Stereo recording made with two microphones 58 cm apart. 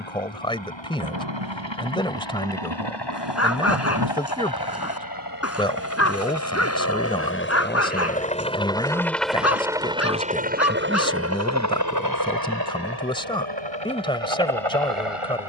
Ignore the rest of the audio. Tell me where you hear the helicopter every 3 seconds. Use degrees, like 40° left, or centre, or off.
50° left, 40° left, 20° left, 10° right, 40° right.